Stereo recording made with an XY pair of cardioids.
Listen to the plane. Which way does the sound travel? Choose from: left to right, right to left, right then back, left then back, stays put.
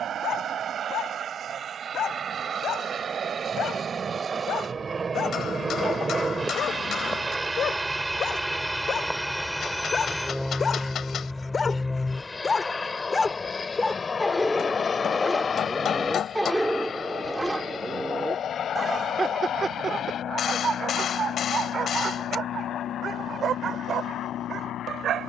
right to left.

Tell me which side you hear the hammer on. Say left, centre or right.
left.